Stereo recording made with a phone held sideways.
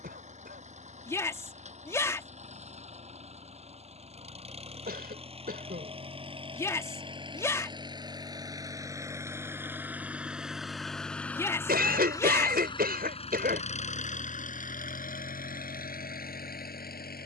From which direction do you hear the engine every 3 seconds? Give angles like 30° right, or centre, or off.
50° right, 40° right, 30° right, centre, 40° left, 70° left.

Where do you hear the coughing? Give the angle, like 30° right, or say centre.
80° right.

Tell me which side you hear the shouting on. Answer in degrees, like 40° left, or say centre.
20° left.